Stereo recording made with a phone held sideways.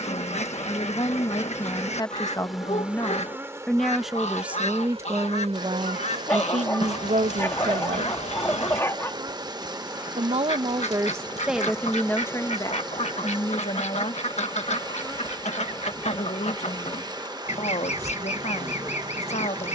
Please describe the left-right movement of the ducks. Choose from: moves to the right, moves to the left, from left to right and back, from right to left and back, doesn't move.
doesn't move.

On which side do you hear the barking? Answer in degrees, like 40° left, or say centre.
20° left.